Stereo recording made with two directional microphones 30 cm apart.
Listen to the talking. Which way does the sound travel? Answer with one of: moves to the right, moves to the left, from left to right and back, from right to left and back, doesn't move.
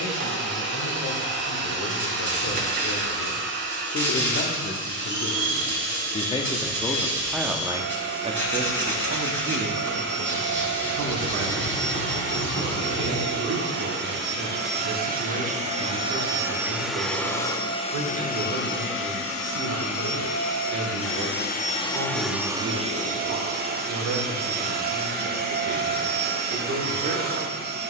moves to the right.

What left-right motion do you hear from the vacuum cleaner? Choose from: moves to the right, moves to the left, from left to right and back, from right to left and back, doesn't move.
from right to left and back.